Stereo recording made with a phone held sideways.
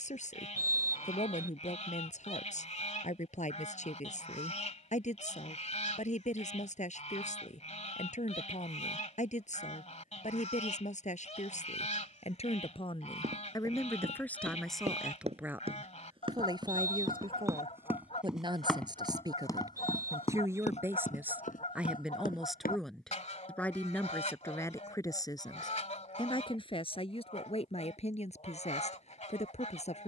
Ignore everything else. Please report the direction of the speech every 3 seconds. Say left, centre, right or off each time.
left, left, left, left, left, right, right, centre, left, left.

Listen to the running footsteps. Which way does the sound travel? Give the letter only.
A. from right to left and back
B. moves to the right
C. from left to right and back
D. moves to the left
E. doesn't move
D.